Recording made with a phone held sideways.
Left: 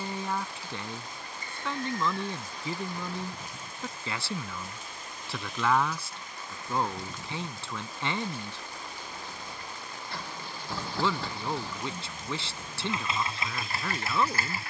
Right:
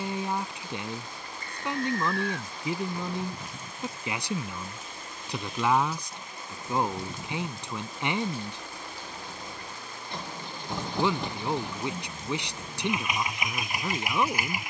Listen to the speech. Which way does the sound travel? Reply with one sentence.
In this clip you hear the speech stay in one place.